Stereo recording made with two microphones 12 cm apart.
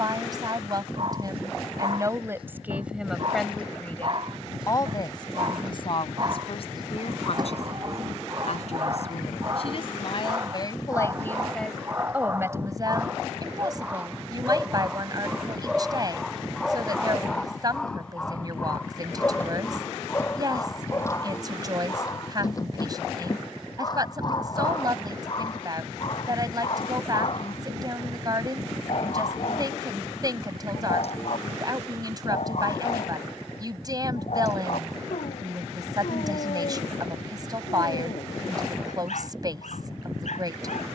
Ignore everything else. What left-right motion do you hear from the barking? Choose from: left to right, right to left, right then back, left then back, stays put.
right to left.